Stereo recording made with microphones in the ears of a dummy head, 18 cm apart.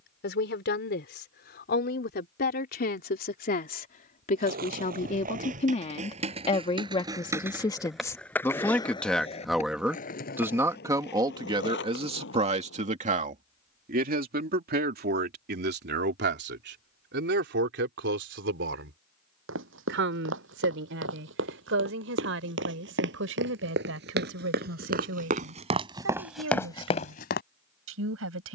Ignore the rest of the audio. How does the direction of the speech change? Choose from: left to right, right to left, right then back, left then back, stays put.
left to right.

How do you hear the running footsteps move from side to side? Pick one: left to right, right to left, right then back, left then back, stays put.
right to left.